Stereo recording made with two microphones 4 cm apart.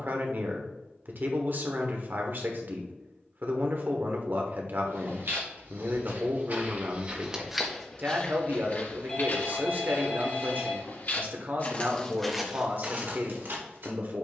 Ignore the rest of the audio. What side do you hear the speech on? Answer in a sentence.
You can hear the speech on the right.